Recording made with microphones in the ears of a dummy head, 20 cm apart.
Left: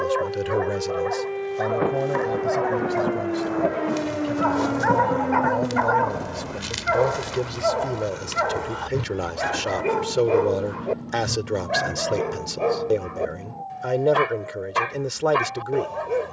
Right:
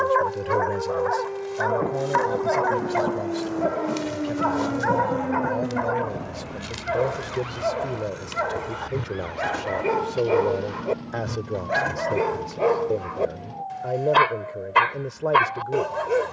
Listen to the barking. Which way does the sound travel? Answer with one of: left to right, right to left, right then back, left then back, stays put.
left then back.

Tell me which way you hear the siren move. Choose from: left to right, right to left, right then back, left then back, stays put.
left to right.